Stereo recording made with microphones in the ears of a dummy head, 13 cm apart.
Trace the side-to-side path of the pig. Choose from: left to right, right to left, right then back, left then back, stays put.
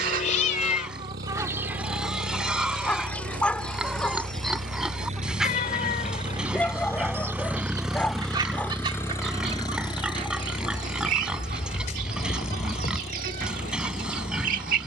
stays put.